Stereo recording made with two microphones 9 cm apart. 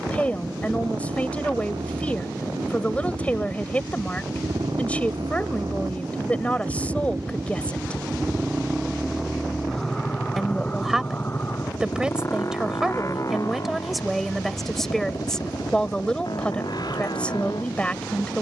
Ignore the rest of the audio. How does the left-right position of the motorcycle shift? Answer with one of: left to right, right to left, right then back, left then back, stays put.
right to left.